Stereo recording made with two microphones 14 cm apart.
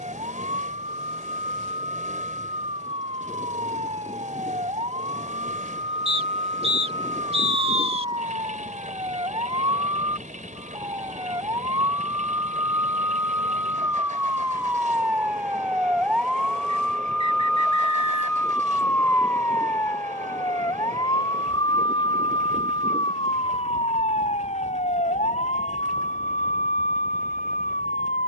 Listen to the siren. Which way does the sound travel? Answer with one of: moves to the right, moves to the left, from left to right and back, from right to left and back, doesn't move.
moves to the left.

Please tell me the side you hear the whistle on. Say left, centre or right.
right.